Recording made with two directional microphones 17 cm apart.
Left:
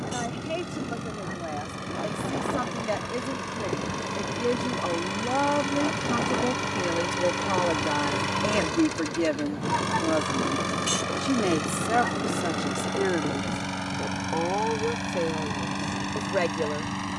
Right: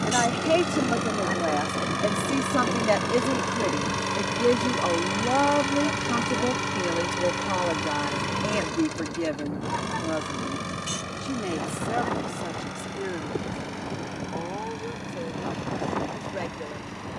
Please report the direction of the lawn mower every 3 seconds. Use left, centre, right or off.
right, right, centre, left, left, left.